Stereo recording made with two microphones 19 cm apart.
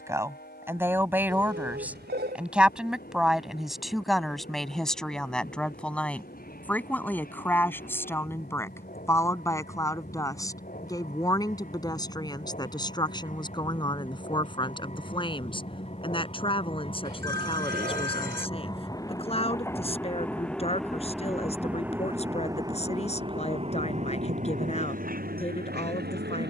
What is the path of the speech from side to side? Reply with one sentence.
You can hear the speech move to the left.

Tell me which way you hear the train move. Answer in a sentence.
You can hear the train move to the right.